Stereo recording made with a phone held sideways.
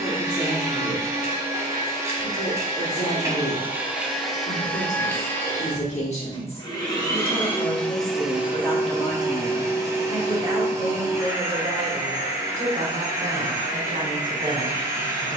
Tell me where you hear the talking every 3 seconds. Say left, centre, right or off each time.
left, left, left, right, right.